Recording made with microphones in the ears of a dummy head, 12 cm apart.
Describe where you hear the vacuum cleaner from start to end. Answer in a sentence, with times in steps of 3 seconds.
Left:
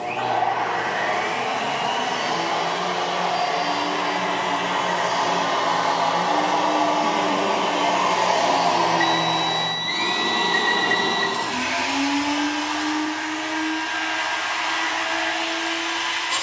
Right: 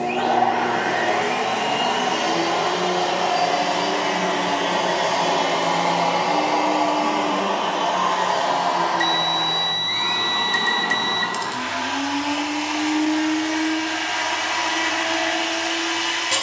You can hear the vacuum cleaner on the right from 0 s, in the centre from 6 s, on the left from 9 s and on the right from 12 s.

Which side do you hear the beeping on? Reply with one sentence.
You can hear the beeping on the right.